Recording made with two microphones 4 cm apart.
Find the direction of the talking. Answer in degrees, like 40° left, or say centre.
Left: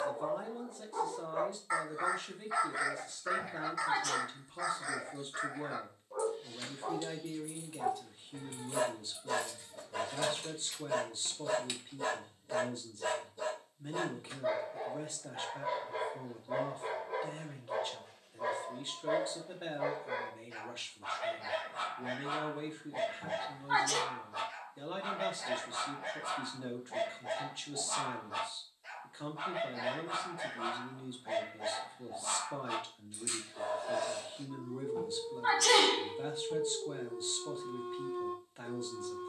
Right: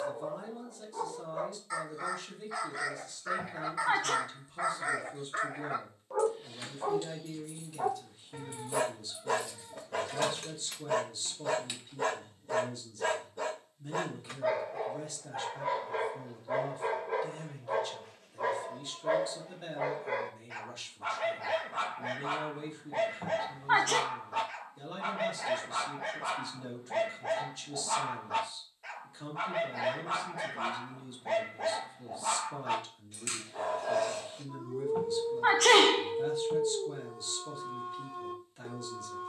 30° left.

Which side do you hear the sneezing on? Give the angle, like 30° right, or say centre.
50° right.